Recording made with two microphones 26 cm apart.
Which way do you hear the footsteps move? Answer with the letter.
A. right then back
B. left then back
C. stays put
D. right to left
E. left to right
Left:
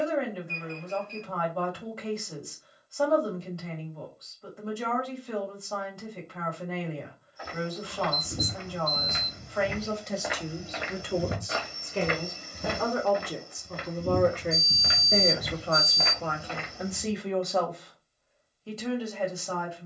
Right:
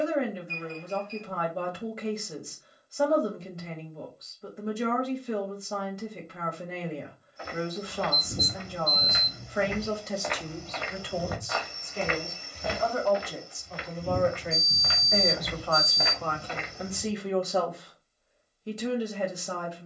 B.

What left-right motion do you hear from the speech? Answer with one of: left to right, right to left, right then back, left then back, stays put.
left then back.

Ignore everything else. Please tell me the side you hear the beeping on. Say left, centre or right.
left.